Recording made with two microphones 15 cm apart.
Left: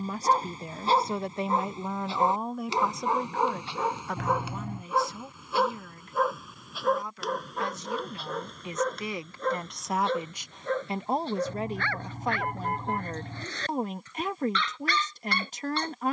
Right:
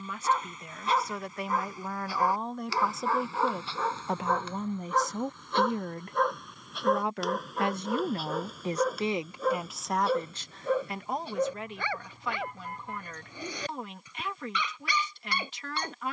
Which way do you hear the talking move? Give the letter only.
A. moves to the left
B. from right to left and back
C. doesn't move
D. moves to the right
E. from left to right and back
E.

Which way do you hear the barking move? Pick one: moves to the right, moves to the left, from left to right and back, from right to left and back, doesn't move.
moves to the right.